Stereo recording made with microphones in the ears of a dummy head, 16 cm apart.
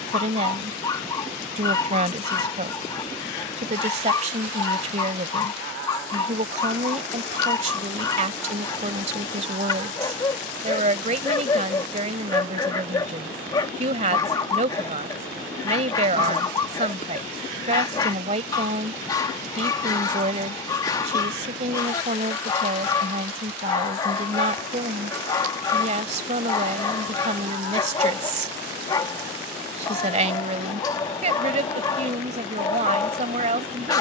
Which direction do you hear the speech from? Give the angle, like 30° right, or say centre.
40° right.